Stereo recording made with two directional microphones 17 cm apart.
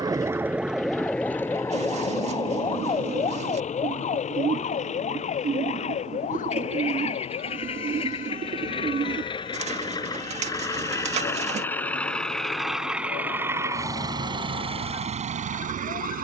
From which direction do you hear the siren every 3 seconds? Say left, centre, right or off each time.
centre, left, left, left, left, left.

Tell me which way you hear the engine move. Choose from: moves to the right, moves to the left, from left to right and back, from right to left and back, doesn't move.
moves to the right.